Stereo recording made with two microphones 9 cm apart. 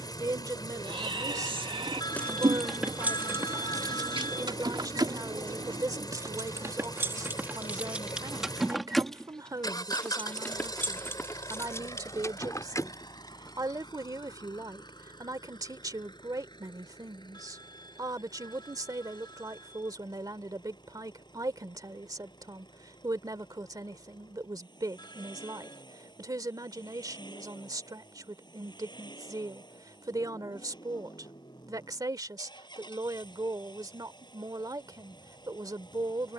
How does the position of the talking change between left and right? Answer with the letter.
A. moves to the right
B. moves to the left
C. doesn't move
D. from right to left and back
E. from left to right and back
C.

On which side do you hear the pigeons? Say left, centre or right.
right.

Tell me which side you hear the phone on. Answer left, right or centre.
left.